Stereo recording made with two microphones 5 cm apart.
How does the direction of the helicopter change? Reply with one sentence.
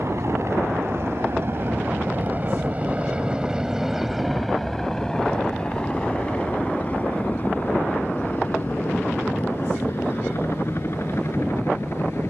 In this clip you hear the helicopter move to the left.